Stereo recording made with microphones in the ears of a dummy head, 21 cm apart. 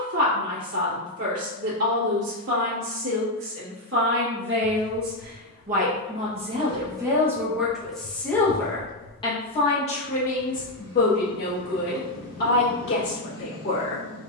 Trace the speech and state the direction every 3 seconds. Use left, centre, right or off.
right, right, centre, left, left.